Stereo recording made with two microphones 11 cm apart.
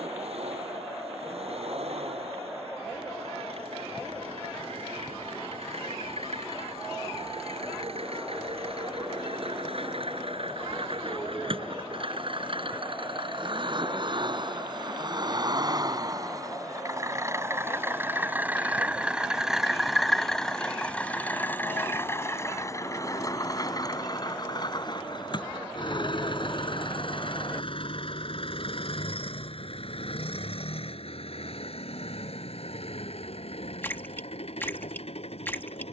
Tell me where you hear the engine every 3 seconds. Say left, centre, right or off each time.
right, right, right, right, right, right, centre, left, left, left, left, left.